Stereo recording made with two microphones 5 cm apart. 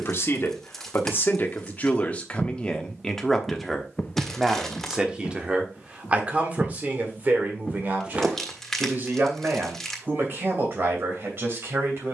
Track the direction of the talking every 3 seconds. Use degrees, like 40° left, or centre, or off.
40° left, 10° right, 40° right, 50° right.